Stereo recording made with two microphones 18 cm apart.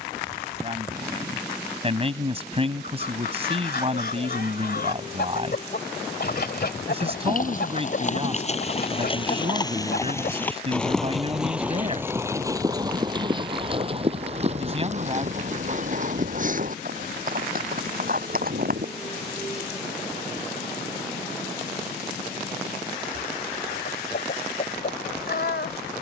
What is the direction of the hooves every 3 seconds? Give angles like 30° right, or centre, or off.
off, off, 40° left, 10° left, 30° right, 50° right, 50° right, off, off.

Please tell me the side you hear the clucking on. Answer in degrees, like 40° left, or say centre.
60° left.